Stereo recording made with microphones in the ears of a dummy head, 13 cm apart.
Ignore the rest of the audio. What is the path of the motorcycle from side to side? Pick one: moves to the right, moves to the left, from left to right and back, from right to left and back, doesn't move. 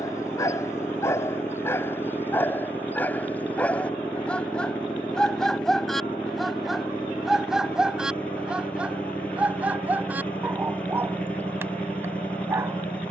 doesn't move.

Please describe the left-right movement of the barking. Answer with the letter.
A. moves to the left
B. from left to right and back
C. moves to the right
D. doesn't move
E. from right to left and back
C.